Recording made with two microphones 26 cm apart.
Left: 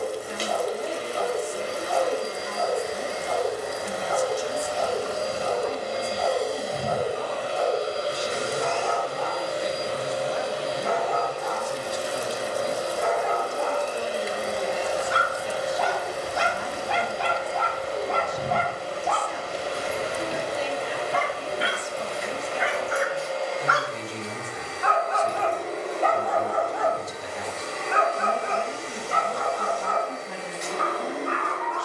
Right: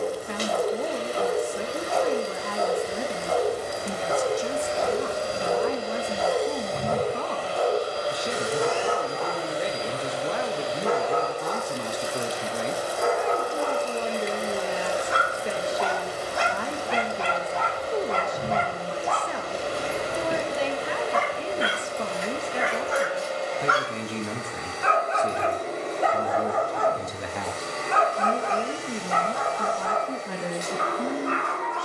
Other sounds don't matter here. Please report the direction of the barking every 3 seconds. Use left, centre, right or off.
right, right, right, right, right, right, right, right, centre, left, left.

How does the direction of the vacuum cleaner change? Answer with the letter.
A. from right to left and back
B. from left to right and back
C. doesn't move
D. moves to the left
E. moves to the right
A.